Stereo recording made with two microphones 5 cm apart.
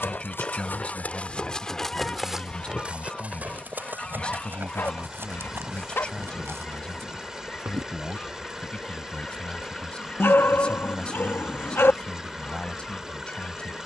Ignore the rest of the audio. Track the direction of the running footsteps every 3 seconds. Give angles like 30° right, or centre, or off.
20° left, 40° right, 60° right, off, off.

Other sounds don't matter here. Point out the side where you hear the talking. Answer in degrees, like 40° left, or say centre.
20° left.